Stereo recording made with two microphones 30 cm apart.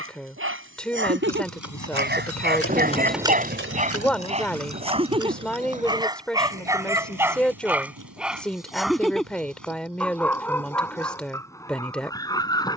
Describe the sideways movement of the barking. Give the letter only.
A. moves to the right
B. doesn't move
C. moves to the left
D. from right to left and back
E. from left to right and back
C.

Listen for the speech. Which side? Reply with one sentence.
In this clip you hear the speech in the centre.